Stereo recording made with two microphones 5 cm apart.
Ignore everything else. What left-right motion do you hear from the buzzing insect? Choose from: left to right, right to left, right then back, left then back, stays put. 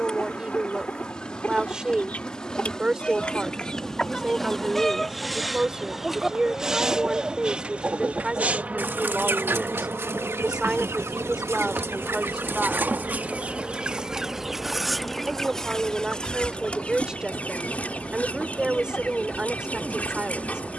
right then back.